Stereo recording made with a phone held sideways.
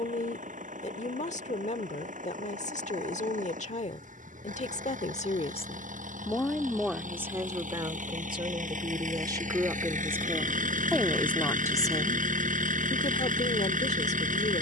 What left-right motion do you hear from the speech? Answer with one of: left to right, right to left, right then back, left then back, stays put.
right then back.